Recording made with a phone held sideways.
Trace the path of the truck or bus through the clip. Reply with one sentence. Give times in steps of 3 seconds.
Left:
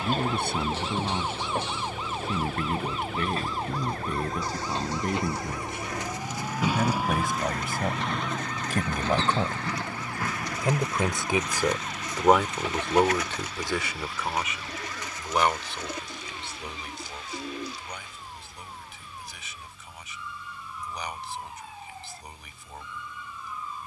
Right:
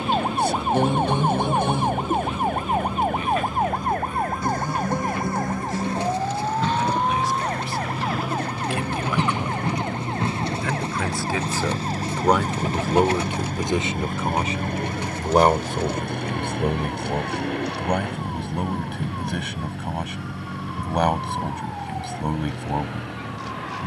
You can hear the truck or bus on the left from 0 s, in the centre from 6 s and on the right from 9 s.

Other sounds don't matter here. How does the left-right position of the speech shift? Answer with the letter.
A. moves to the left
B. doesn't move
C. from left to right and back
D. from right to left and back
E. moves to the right
E.